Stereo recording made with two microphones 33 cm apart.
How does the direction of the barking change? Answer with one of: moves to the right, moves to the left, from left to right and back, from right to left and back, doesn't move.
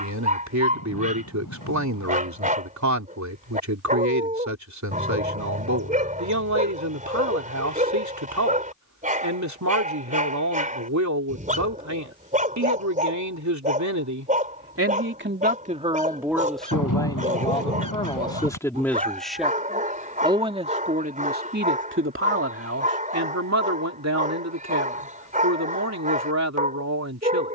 doesn't move.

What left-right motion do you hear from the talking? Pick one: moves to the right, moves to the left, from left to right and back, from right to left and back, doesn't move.
from right to left and back.